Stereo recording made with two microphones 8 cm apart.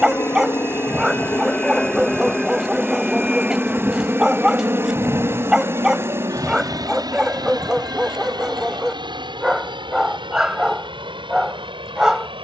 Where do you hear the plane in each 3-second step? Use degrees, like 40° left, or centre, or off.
20° left, 20° right, 50° right, 60° right.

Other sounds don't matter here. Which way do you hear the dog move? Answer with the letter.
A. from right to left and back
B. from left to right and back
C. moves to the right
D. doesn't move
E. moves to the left
D.